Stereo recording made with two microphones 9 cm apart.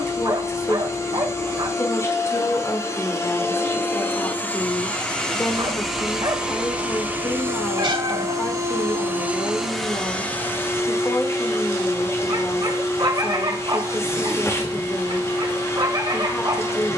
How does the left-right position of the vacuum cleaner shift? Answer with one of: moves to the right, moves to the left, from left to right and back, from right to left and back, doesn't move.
from left to right and back.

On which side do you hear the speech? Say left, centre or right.
left.